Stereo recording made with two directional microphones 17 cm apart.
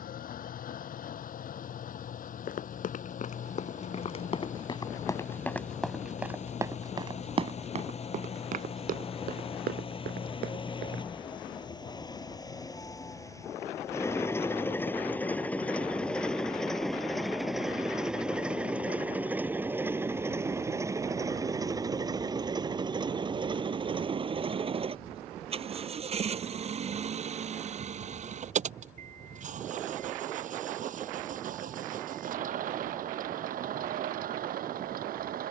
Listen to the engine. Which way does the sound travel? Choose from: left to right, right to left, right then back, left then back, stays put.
left to right.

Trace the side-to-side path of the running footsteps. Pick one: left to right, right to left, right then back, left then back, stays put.
left to right.